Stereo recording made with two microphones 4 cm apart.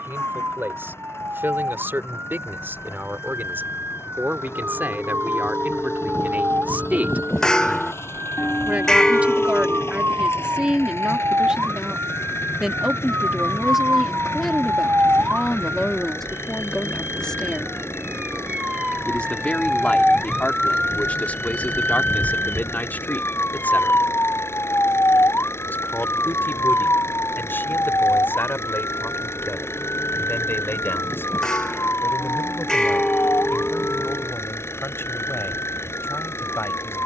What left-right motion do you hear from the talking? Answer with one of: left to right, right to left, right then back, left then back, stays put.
right to left.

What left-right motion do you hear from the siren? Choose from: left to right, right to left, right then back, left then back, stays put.
right to left.